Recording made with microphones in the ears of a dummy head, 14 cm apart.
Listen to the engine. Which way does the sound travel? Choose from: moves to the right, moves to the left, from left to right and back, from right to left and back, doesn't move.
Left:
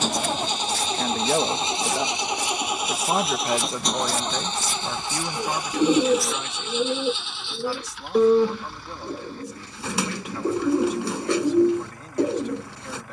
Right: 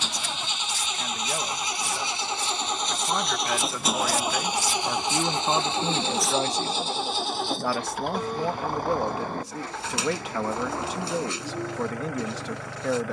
moves to the right.